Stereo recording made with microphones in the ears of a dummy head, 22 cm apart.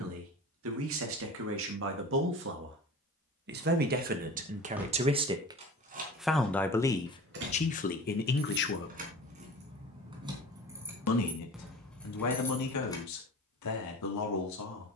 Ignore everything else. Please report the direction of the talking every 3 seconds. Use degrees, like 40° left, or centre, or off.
60° right, 30° right, 30° left, 70° left, 80° left.